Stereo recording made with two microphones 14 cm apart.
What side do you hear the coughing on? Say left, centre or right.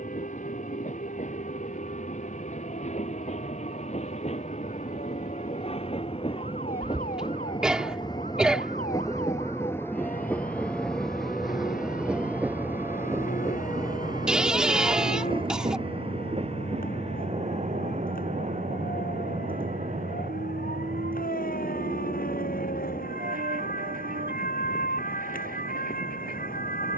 centre.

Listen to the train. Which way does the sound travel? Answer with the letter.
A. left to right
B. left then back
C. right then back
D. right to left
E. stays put
A.